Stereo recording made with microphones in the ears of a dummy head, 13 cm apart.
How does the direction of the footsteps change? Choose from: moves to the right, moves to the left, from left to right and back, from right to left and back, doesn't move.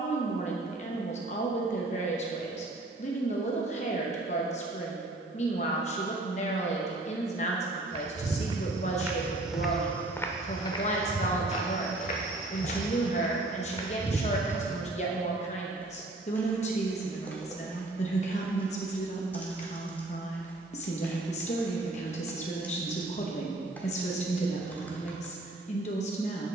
from right to left and back.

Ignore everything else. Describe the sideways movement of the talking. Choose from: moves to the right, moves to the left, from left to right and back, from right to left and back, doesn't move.
doesn't move.